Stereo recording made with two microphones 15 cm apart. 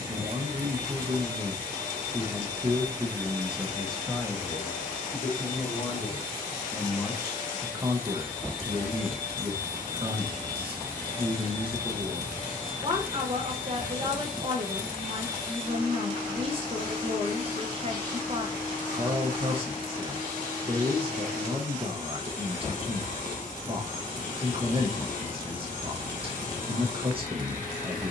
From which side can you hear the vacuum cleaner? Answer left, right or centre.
left.